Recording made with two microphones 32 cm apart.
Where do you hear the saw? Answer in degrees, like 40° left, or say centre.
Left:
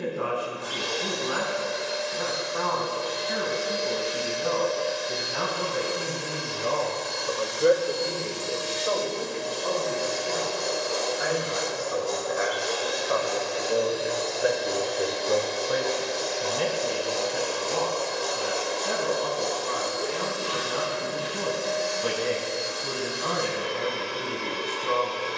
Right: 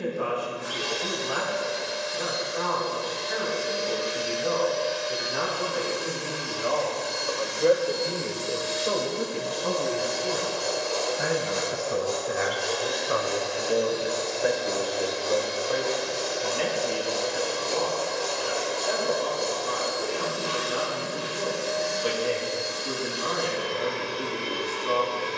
30° left.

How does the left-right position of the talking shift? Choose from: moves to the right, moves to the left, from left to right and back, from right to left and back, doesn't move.
from left to right and back.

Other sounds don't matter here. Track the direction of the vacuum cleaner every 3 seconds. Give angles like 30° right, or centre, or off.
70° left, 60° left, 50° left, 30° left, centre, 20° right, 40° right, 50° right, 50° right.